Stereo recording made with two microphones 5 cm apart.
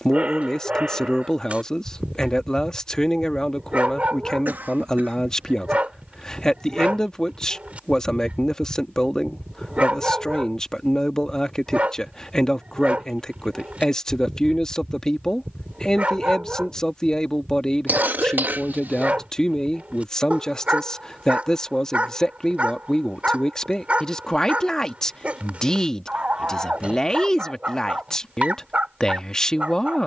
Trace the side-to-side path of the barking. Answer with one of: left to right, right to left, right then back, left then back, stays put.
stays put.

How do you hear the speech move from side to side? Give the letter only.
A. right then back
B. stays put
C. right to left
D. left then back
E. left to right
B.